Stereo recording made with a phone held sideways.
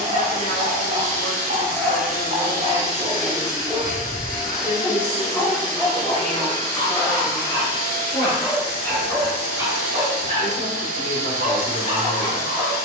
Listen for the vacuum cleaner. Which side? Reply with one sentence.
In this clip you hear the vacuum cleaner on the left.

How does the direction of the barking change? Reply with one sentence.
In this clip you hear the barking go left and come back.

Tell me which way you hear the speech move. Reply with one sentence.
In this clip you hear the speech stay put.